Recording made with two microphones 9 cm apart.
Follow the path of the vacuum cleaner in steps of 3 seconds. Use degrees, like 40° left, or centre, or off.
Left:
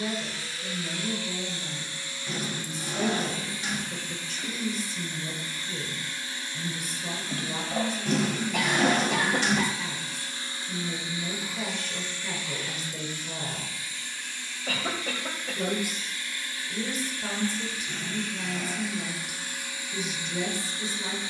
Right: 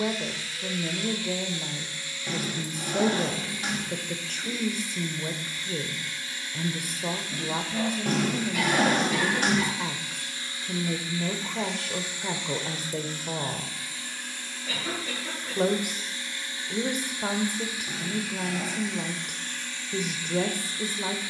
30° left, 30° left, 30° left, 20° left, 40° right, 20° right, 10° left.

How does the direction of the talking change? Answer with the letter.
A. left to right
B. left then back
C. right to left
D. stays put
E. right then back
D.